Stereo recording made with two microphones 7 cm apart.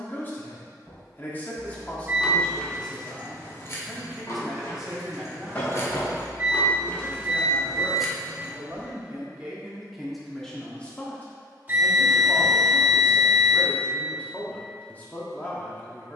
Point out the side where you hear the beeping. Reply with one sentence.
You can hear the beeping on the right.